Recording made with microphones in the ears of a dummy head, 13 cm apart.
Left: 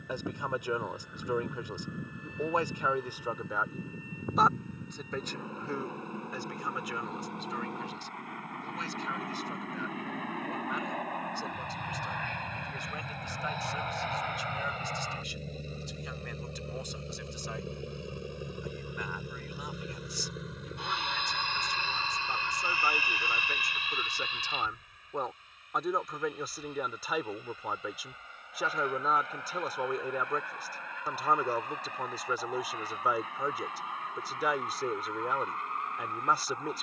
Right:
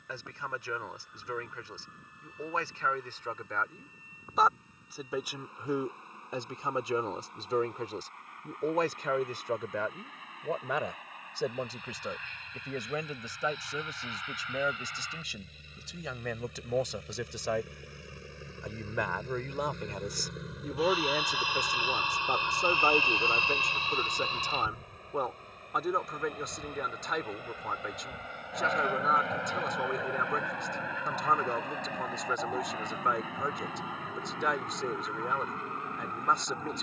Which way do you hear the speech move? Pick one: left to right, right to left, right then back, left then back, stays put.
right then back.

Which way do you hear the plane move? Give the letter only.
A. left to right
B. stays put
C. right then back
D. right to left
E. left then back
A.